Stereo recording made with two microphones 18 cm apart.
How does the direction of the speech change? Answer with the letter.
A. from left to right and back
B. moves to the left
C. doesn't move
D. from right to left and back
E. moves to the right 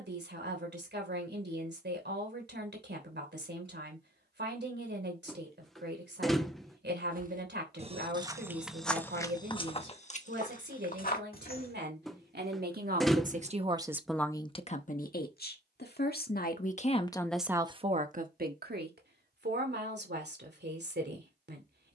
D.